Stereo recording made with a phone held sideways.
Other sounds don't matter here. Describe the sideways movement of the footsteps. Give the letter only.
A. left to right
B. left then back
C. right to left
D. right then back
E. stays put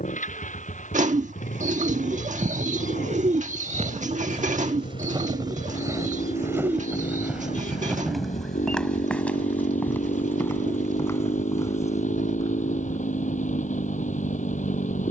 C.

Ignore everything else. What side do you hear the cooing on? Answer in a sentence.
You can hear the cooing on the right.